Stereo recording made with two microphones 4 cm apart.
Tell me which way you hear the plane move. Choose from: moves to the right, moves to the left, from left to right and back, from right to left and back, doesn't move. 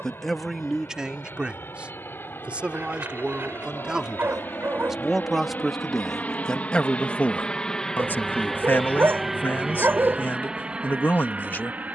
moves to the right.